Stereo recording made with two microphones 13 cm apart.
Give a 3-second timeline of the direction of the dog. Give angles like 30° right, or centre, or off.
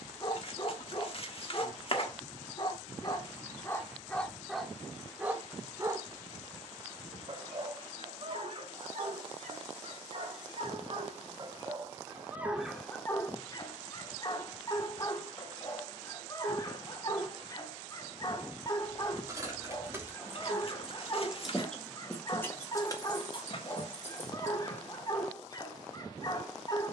40° left, centre, 40° right, 50° right, 20° left, 30° left, 30° left, 30° left, 30° left.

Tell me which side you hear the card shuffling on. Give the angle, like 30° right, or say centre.
50° left.